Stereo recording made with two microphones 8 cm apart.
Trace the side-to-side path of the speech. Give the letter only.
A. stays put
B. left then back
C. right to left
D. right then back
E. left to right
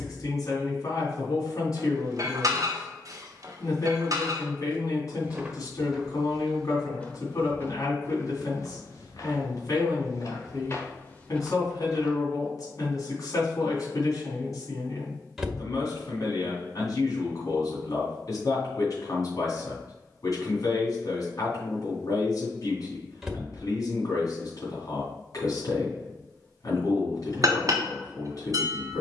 A.